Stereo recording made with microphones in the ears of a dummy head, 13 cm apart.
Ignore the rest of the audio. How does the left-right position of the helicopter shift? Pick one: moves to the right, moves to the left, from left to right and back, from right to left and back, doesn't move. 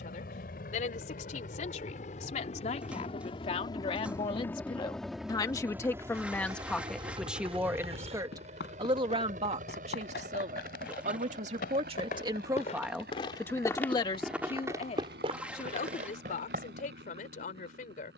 moves to the right.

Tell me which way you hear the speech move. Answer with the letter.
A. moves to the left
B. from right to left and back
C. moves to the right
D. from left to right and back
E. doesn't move
D.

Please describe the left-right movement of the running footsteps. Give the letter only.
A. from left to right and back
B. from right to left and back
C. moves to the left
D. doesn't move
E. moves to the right
E.